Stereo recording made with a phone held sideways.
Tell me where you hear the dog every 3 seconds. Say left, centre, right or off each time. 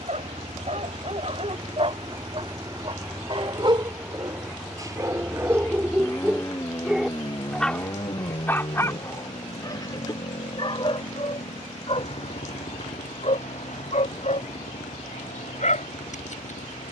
right, right, centre, left, left, left.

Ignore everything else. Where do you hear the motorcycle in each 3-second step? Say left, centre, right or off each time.
right, centre, left, left, left, left.